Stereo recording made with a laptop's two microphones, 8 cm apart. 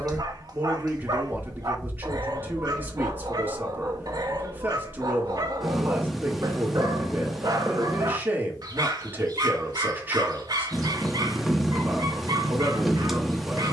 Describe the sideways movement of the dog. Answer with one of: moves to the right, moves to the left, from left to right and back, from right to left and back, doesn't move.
doesn't move.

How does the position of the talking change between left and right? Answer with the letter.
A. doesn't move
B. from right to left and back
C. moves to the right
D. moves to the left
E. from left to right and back
A.